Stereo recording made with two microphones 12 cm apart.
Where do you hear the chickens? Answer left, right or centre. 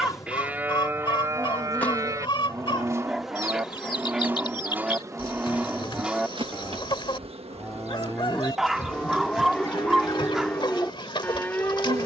left.